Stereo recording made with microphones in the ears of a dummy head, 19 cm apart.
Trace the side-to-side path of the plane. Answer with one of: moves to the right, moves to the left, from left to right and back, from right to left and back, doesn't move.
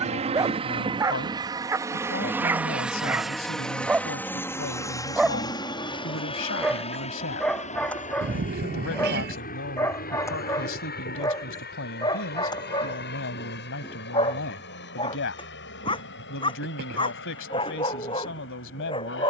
moves to the left.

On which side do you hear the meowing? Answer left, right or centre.
right.